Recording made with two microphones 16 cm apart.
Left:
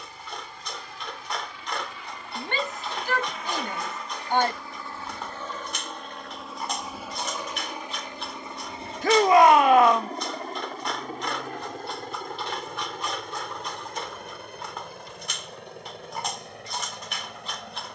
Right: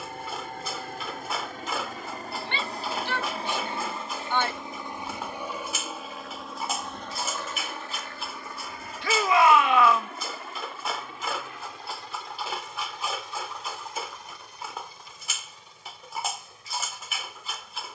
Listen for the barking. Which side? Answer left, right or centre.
centre.